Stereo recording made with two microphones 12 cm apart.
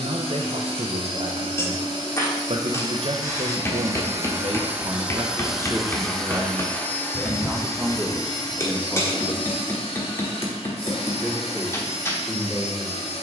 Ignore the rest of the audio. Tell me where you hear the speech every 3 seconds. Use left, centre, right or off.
right, right, centre, centre, centre.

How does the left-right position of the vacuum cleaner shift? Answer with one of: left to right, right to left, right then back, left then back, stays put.
right to left.